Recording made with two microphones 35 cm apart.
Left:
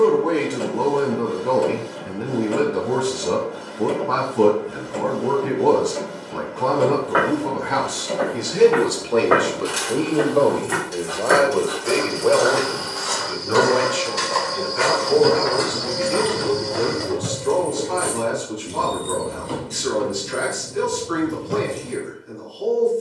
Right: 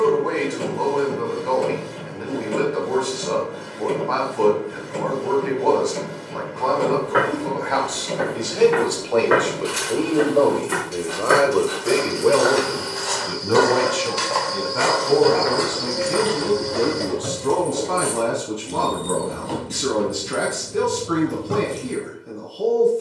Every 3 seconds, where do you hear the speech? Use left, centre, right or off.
left, left, left, centre, right, right, right, right.